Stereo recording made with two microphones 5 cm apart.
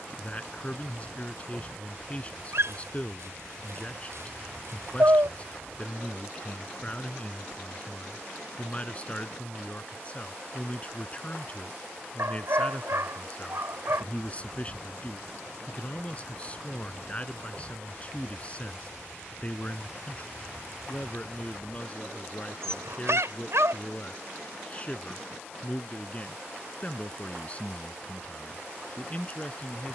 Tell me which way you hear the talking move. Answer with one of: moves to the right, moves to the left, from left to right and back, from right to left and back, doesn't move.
doesn't move.